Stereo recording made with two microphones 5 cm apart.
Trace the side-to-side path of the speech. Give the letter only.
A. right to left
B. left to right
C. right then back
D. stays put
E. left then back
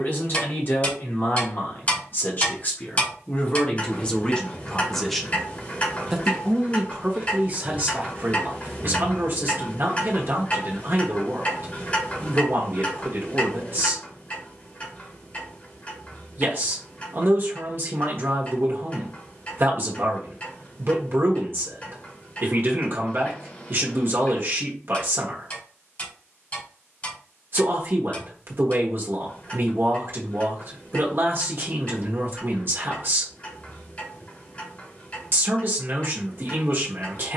B.